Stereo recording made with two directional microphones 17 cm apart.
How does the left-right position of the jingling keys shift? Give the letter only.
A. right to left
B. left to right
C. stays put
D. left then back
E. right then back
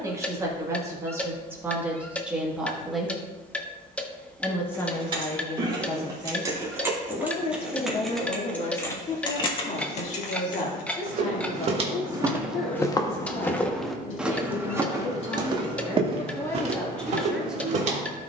A.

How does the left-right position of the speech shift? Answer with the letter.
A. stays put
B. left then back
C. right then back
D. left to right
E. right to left
B.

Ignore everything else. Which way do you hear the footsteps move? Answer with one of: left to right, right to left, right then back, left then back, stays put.
left then back.